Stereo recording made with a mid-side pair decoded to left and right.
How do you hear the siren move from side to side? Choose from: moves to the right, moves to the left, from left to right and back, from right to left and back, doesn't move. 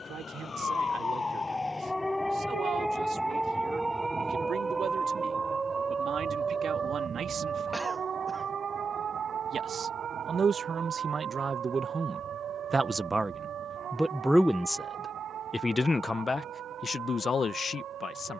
moves to the right.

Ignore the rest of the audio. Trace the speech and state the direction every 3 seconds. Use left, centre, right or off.
right, right, right, right, centre, left.